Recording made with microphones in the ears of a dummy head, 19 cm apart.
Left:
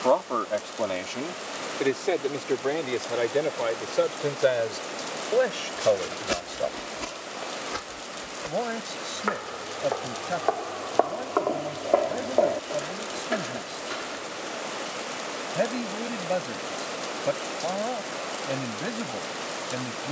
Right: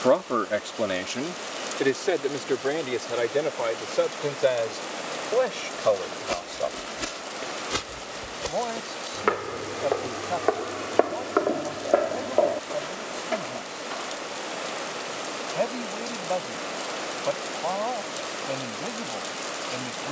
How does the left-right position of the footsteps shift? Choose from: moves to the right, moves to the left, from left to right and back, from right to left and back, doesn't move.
from left to right and back.